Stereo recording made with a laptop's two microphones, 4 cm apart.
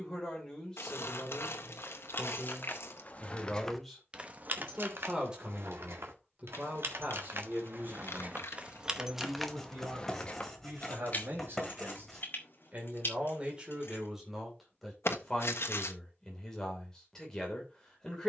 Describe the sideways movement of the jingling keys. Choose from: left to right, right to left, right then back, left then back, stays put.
right then back.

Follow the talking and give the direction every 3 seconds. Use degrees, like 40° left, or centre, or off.
20° left, 10° right, 50° right, 60° right, 20° right, 10° left.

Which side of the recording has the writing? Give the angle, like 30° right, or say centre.
10° left.